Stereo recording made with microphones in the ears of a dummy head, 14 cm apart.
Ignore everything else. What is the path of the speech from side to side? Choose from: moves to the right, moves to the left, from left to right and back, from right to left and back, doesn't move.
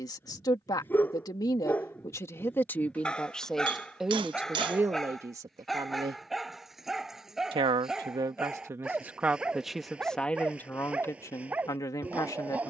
from left to right and back.